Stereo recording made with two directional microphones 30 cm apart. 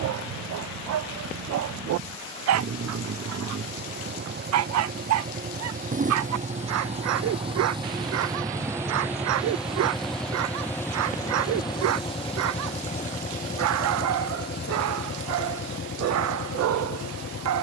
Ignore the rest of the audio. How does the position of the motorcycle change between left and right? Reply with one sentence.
You can hear the motorcycle move from right to left.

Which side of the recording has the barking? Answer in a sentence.
You can hear the barking on the right.